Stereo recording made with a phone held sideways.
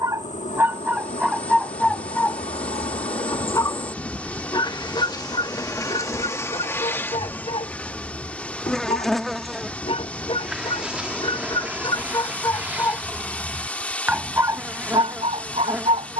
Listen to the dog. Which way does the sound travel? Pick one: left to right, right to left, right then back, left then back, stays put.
left then back.